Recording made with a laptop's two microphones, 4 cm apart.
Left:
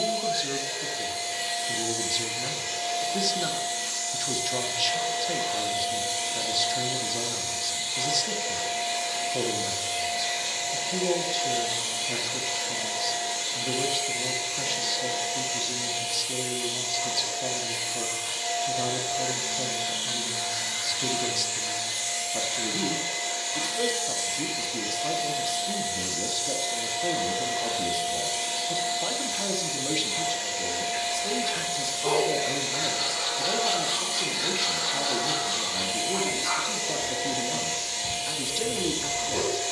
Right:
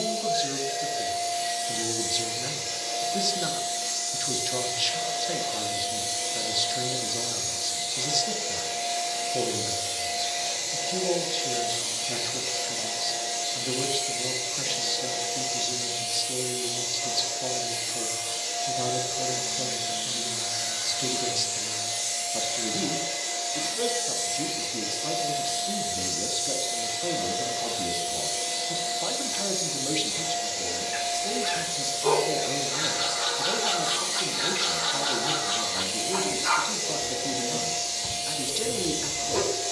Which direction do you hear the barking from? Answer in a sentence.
You can hear the barking on the right.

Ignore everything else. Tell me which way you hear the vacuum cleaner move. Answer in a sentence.
You can hear the vacuum cleaner stay in one place.